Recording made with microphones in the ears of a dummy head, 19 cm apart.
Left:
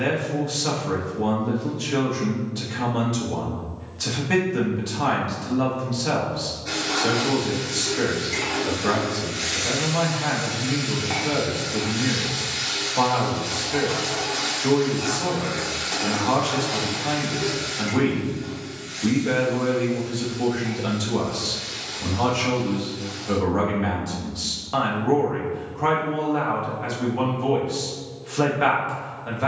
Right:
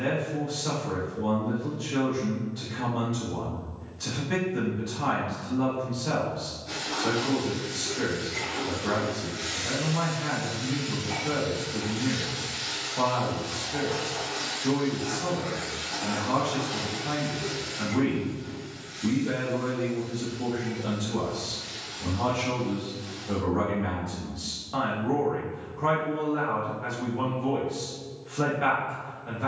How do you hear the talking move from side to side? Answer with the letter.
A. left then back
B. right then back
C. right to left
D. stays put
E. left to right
D.